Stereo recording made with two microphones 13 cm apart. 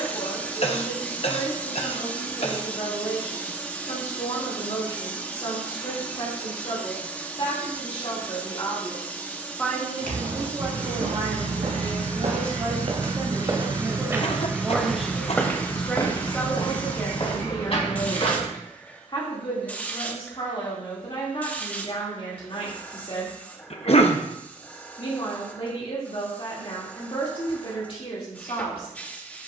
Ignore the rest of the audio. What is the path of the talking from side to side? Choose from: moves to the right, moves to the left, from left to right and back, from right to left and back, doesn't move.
from left to right and back.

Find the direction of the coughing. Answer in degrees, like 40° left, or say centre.
50° left.